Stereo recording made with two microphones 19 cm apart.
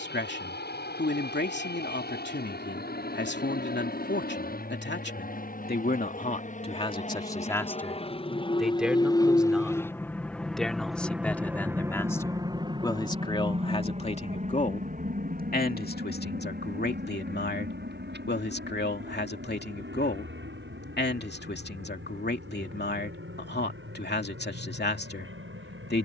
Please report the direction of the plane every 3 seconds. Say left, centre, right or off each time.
left, left, left, centre, right, right, right, right, right.